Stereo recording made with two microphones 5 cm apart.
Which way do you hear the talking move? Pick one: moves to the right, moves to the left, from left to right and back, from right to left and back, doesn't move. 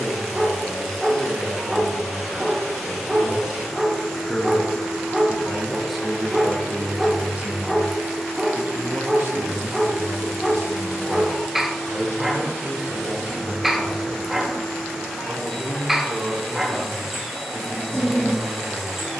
moves to the right.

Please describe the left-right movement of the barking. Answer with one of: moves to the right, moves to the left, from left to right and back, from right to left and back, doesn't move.
doesn't move.